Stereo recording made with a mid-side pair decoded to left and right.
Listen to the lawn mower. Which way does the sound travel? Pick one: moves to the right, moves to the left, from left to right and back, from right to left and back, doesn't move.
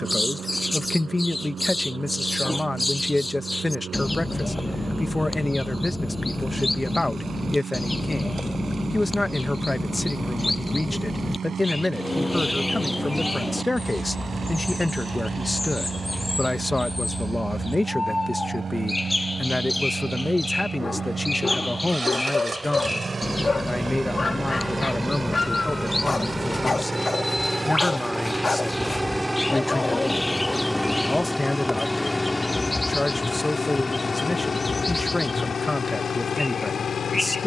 moves to the left.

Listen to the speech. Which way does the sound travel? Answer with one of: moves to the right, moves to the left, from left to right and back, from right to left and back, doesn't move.
doesn't move.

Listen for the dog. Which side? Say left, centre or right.
left.